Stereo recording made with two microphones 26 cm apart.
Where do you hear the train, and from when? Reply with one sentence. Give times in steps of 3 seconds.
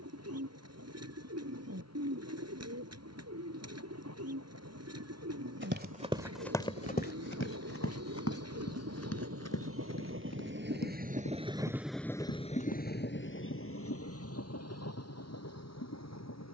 In this clip you hear the train on the right from 0 s and on the left from 12 s.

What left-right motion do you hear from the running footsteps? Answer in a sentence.
In this clip you hear the running footsteps move from right to left.